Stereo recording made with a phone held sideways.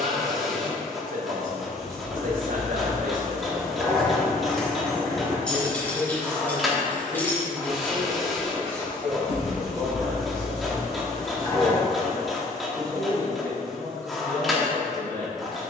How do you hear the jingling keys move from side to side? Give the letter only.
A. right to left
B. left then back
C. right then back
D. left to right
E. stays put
A.